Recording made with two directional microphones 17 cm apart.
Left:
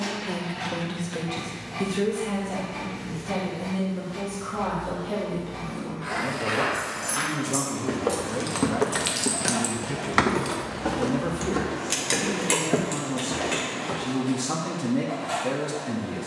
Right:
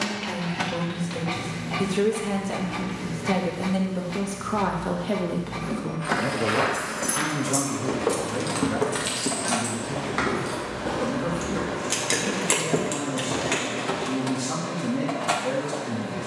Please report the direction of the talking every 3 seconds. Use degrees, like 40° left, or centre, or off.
10° right, 50° right, 10° right, 20° left, 20° left, 20° left.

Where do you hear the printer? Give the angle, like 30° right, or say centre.
70° right.